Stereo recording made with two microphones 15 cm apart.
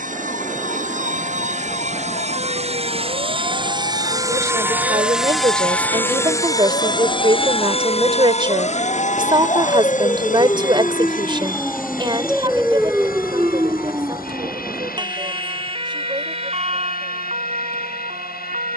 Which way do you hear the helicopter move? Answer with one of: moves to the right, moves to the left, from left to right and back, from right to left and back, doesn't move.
moves to the left.